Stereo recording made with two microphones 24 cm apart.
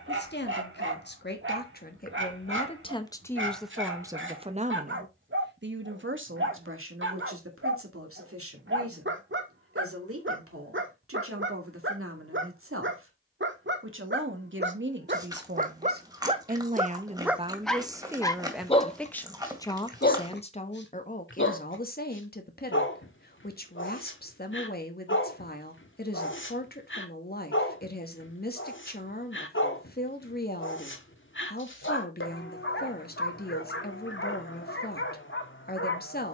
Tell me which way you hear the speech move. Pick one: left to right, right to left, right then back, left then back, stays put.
right then back.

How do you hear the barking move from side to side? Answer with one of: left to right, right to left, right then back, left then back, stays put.
right to left.